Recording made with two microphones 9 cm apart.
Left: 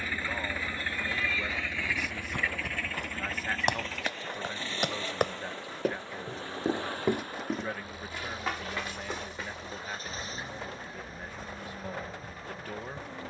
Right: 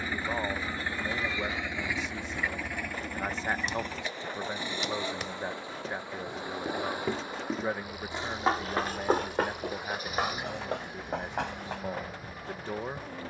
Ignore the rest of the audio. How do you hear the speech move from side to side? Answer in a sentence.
You can hear the speech stay put.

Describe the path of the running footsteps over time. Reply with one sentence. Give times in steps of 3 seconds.
In this clip you hear the running footsteps on the left from 0 s, in the centre from 6 s, on the right from 9 s and not at all from 12 s.